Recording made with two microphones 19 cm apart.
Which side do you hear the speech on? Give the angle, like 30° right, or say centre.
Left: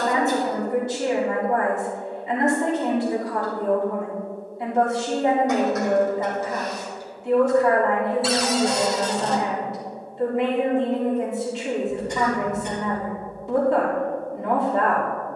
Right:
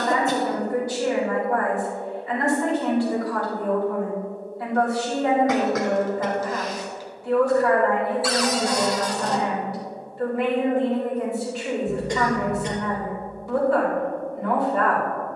20° left.